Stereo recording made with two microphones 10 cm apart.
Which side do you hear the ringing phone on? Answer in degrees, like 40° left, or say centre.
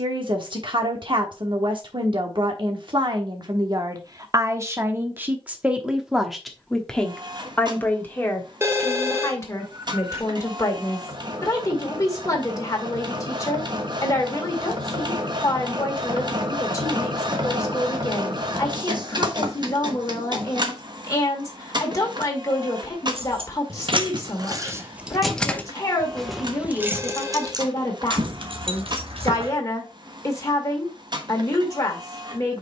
30° right.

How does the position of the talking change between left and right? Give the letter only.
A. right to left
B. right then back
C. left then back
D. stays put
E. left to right
A.